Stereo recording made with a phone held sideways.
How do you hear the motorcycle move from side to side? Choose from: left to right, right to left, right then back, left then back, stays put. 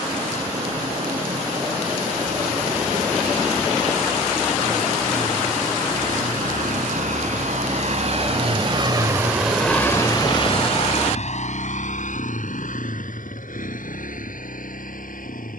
right to left.